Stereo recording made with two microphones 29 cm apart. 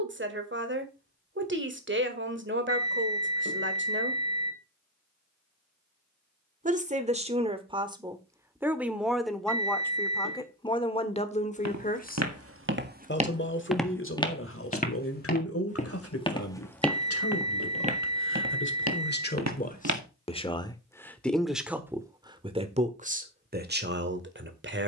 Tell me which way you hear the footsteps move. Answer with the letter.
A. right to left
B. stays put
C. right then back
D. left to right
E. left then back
E.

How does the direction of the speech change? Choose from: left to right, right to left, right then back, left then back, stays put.
left then back.